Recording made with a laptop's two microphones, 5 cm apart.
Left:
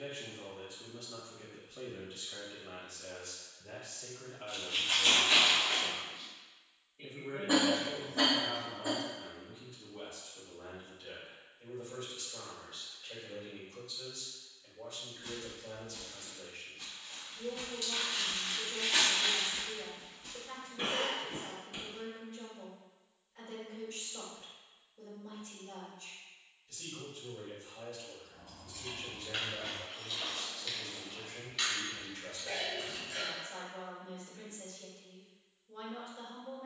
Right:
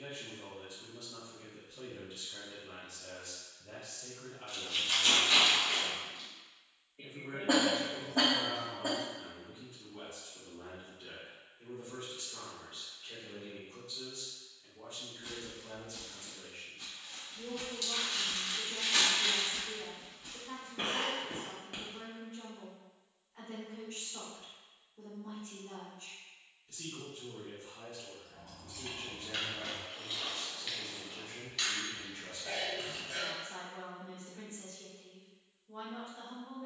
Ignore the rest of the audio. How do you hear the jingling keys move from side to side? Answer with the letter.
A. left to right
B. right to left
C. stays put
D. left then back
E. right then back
D.